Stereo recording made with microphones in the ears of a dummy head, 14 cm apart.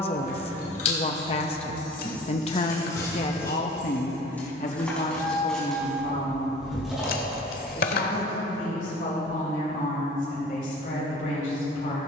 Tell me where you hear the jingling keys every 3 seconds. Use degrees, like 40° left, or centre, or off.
40° left, 10° left, centre, off.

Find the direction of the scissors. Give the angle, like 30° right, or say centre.
60° left.